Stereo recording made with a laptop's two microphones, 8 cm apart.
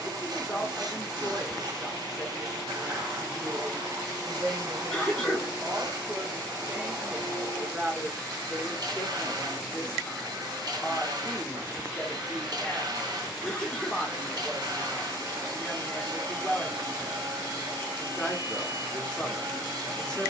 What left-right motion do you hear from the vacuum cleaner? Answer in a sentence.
You can hear the vacuum cleaner stay in one place.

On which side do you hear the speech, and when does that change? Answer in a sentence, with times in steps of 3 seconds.
You can hear the speech in the centre from 0 s, on the right from 3 s and in the centre from 6 s.